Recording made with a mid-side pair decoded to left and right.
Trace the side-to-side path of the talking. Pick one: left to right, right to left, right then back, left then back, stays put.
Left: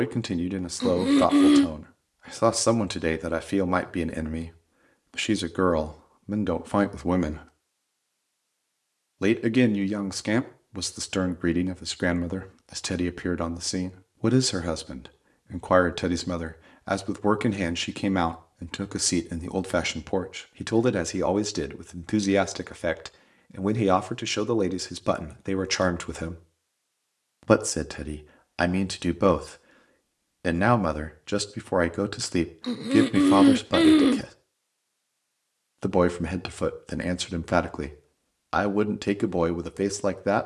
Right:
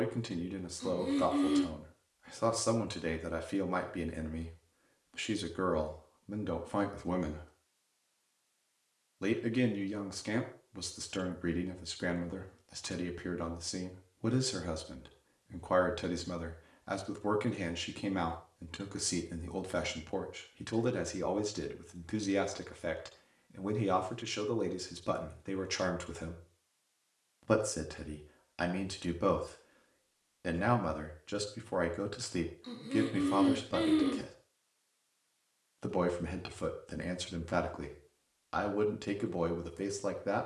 stays put.